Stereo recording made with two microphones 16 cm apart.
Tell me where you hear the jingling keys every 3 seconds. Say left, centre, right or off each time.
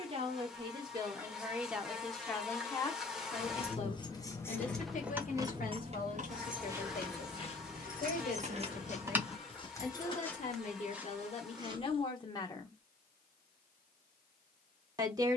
off, centre, right, centre, off.